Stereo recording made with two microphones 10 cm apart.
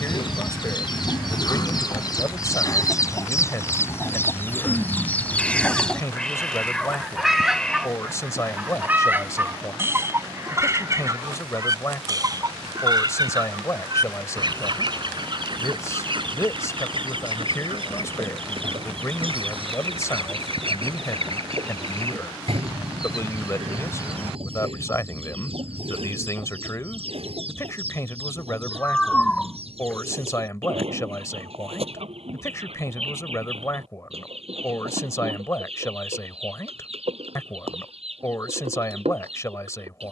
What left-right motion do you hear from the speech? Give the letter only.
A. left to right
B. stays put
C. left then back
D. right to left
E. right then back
B.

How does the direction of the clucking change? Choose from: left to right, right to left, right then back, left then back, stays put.
left to right.